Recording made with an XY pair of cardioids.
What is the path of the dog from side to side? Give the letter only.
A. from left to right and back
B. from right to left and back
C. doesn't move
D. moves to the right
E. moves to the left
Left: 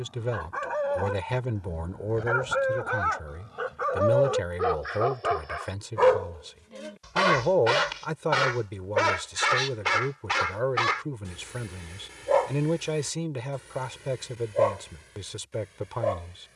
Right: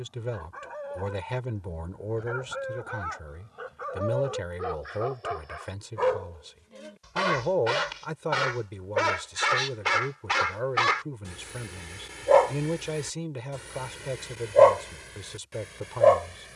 D.